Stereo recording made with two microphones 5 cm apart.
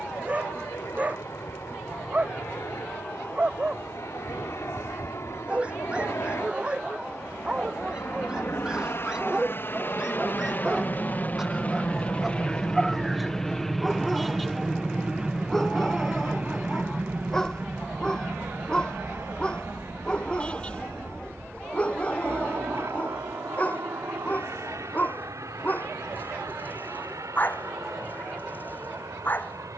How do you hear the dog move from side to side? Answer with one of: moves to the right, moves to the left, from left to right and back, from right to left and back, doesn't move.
moves to the left.